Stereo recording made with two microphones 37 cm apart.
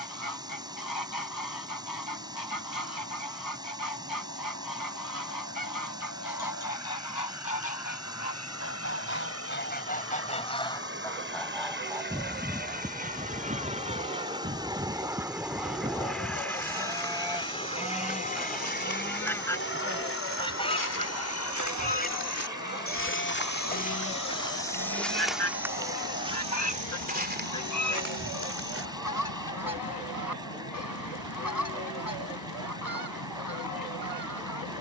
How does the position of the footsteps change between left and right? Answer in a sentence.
In this clip you hear the footsteps go from the left side to the right.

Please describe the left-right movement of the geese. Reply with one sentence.
In this clip you hear the geese go right and come back.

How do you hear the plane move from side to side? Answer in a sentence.
In this clip you hear the plane go from the right side to the left.